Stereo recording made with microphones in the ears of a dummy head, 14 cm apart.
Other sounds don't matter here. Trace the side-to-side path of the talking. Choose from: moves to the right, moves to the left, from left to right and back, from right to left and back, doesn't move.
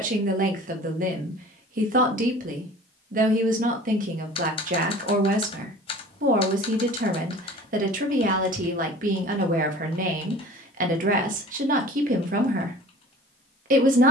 doesn't move.